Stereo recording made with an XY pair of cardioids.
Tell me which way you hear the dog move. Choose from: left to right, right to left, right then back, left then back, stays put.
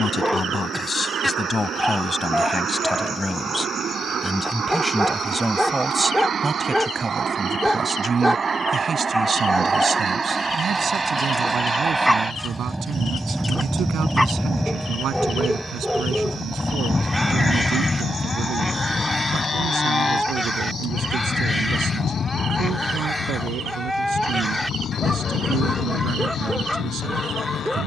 stays put.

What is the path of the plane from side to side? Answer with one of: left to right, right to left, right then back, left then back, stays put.
right to left.